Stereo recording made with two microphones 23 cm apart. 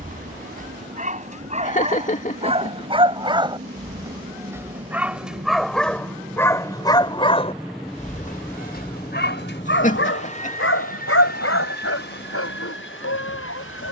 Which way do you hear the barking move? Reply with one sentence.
You can hear the barking travel towards the left.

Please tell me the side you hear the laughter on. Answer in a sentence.
You can hear the laughter on the left.